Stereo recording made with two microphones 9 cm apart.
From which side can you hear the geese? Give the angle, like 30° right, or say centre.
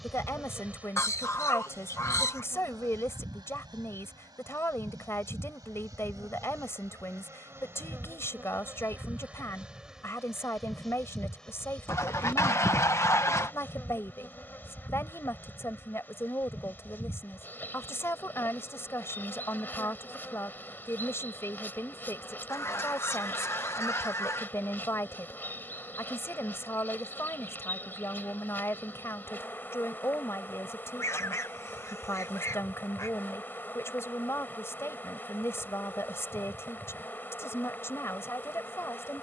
30° left.